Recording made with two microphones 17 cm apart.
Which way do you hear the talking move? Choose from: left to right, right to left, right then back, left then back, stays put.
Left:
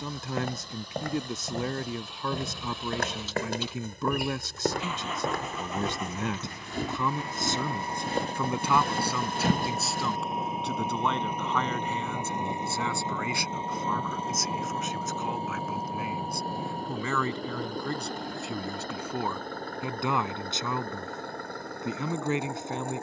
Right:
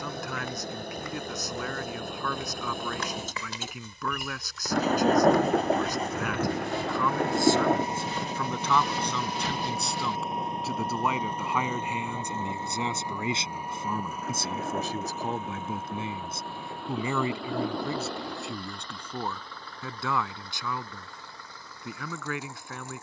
right then back.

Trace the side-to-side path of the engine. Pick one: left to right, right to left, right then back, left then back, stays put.
right to left.